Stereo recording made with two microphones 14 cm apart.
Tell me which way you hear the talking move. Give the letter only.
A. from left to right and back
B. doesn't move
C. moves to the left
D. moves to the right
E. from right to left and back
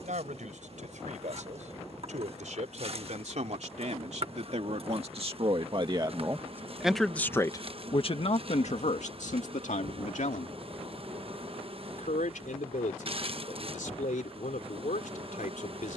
C.